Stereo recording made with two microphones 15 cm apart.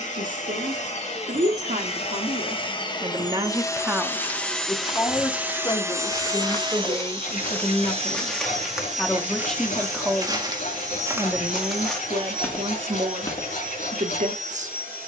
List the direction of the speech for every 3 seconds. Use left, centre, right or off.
right, centre, left, centre, right.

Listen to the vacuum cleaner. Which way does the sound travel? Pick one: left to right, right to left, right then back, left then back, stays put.
left to right.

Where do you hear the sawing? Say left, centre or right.
left.